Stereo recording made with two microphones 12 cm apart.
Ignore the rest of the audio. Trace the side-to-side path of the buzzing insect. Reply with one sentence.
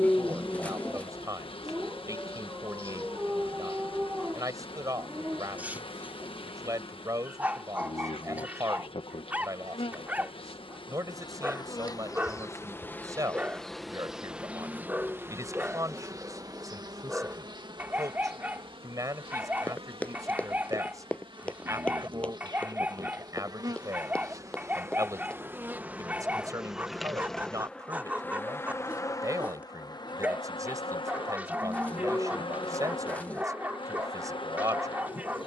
In this clip you hear the buzzing insect move from left to right and back again.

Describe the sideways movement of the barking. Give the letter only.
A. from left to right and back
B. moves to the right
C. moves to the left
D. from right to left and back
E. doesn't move
E.